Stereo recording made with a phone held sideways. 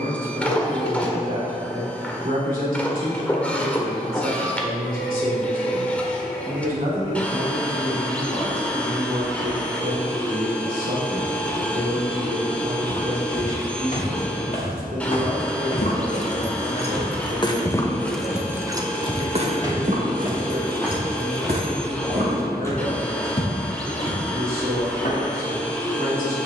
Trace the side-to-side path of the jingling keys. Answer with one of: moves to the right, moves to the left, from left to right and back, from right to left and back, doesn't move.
moves to the right.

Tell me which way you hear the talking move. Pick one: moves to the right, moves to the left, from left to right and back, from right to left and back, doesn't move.
doesn't move.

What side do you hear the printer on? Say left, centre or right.
centre.